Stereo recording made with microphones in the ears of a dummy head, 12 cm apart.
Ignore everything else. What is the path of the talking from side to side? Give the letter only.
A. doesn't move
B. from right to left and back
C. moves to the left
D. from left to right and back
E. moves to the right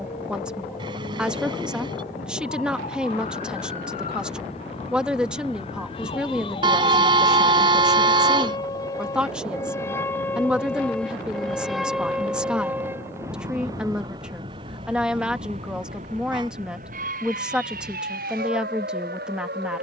A.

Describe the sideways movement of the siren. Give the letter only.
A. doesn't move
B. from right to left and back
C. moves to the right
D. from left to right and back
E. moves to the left
C.